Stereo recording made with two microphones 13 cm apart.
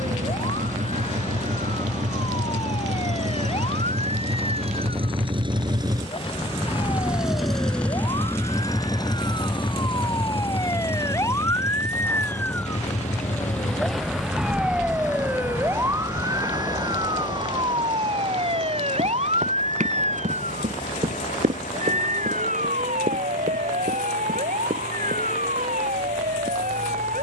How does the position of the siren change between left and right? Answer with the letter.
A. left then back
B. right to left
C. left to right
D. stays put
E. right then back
C.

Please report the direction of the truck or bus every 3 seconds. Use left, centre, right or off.
right, right, centre, left, left, left, left, left, left.